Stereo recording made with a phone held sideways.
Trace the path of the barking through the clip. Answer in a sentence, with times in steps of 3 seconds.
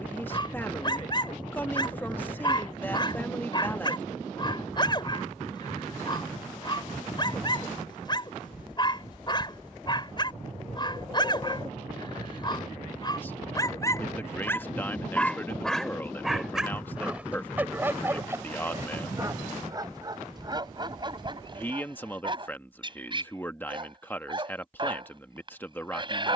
You can hear the barking on the left from 0 s, in the centre from 15 s and on the right from 18 s.